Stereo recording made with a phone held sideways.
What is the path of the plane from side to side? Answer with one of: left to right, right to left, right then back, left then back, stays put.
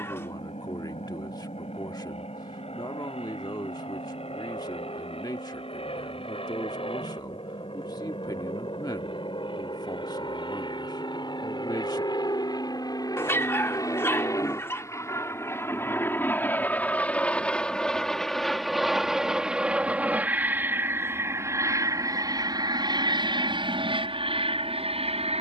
left to right.